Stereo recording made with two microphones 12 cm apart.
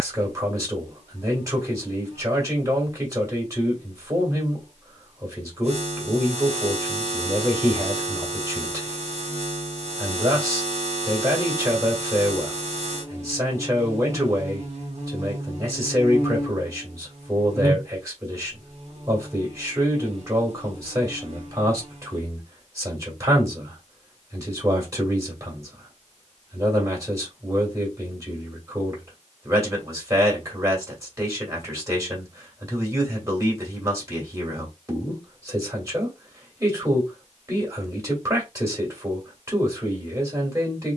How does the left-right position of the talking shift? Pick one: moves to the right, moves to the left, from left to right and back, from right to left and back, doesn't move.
doesn't move.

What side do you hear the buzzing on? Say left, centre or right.
right.